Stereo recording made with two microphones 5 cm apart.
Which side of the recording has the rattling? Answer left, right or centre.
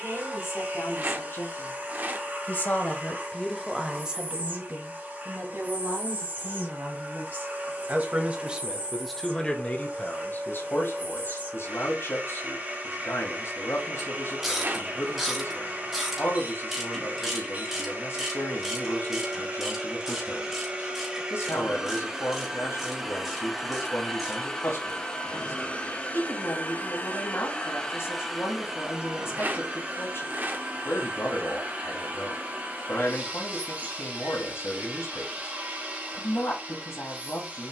right.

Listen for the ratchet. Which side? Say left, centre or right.
centre.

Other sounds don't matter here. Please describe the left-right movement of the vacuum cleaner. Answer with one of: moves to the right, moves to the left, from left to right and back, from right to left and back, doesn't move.
from right to left and back.